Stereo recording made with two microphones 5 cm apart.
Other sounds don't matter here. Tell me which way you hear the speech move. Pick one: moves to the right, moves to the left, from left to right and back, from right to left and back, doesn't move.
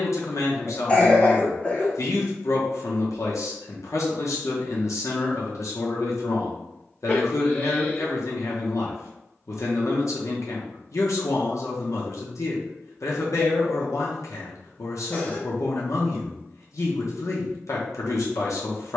doesn't move.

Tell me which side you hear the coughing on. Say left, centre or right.
left.